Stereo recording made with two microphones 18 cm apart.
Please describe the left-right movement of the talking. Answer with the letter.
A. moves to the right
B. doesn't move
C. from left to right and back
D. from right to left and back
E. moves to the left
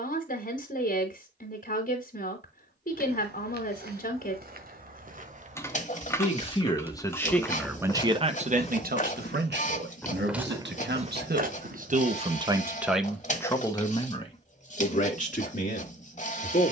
C.